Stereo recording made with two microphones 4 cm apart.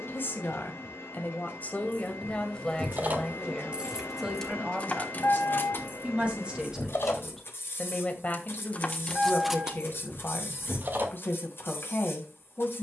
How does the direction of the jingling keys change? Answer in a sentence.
You can hear the jingling keys move from right to left and back again.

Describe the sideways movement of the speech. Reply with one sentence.
In this clip you hear the speech go right and come back.